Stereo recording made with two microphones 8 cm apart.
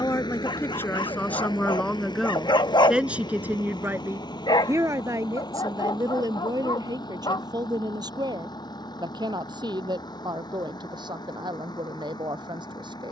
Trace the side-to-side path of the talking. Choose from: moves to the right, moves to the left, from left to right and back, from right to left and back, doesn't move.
moves to the right.